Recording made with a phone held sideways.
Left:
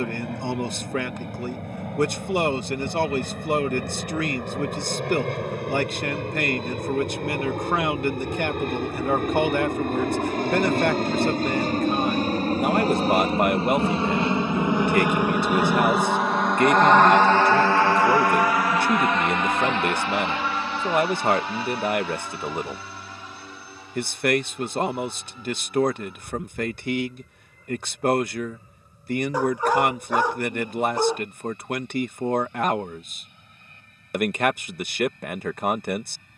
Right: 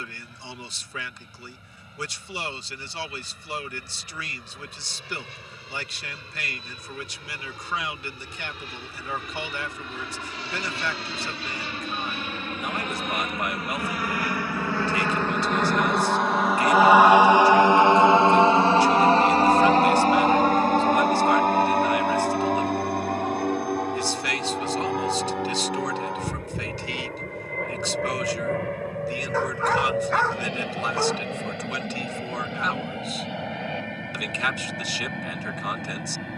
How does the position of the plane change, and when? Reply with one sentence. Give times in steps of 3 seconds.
In this clip you hear the plane on the left from 0 s, in the centre from 15 s and on the right from 18 s.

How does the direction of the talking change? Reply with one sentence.
You can hear the talking stay put.